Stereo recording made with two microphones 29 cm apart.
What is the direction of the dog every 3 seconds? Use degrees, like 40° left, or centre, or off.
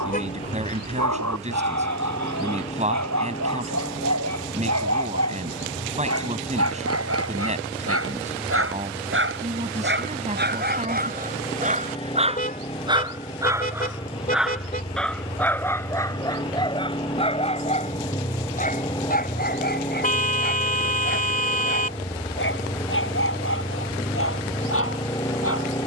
70° right, 60° right, 50° right, 30° right, 10° right, 10° left, 30° left, 40° left, 50° left.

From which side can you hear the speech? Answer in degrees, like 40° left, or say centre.
20° right.